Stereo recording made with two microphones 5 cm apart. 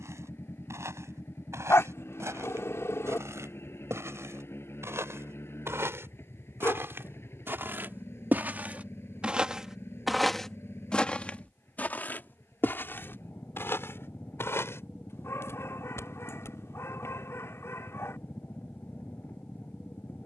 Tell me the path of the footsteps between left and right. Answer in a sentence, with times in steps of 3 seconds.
You can hear the footsteps on the right from 0 s, in the centre from 9 s, on the left from 12 s and not at all from 18 s.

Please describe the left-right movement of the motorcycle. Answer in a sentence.
You can hear the motorcycle stay put.